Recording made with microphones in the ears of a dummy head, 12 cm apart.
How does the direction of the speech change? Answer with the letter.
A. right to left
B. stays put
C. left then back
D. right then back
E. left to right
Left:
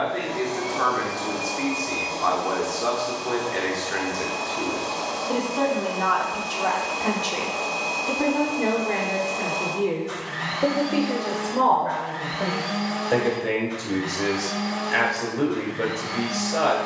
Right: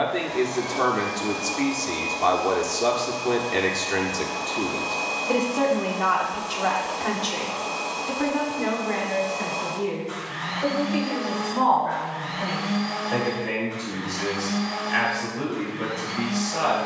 A.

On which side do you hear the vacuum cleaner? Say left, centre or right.
left.